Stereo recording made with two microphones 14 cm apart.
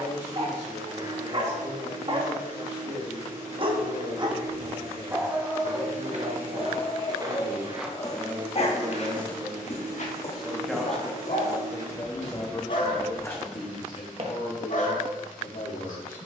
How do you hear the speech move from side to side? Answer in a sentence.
You can hear the speech travel towards the left.